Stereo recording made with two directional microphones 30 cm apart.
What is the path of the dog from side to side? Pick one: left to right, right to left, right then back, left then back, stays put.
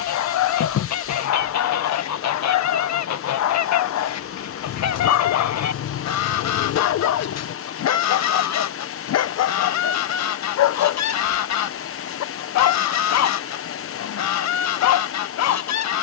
stays put.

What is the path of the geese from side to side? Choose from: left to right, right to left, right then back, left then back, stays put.
stays put.